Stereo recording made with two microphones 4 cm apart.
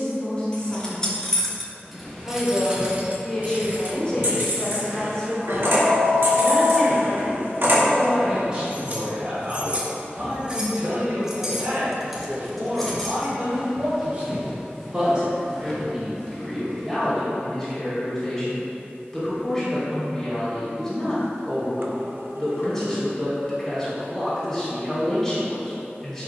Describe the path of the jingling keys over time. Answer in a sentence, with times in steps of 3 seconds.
In this clip you hear the jingling keys in the centre from 0 s, on the right from 3 s, in the centre from 12 s and not at all from 15 s.